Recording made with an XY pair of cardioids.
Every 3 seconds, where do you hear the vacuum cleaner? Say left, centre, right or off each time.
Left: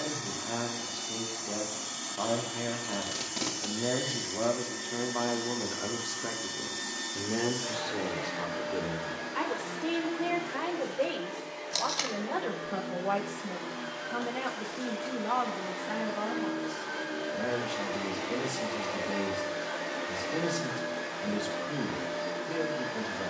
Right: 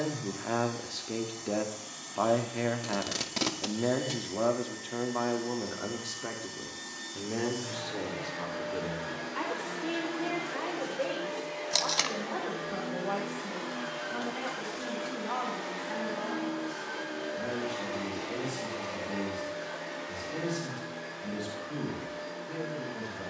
left, left, left, centre, centre, centre, left, left.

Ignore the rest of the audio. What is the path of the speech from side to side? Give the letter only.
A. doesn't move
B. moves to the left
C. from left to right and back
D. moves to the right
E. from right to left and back
B.